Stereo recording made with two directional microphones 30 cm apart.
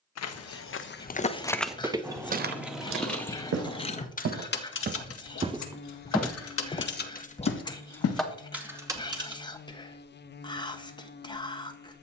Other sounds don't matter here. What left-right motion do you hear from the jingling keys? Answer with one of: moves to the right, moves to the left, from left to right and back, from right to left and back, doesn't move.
from right to left and back.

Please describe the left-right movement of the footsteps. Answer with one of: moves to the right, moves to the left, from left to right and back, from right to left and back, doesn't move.
from left to right and back.